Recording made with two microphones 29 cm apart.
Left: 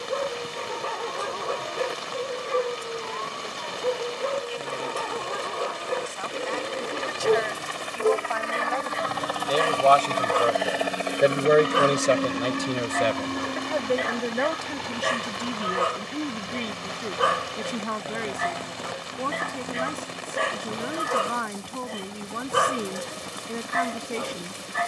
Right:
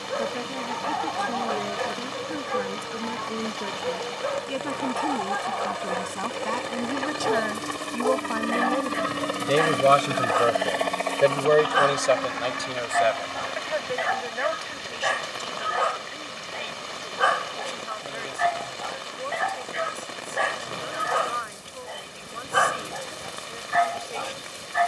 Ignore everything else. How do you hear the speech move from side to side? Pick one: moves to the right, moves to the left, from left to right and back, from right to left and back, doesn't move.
moves to the left.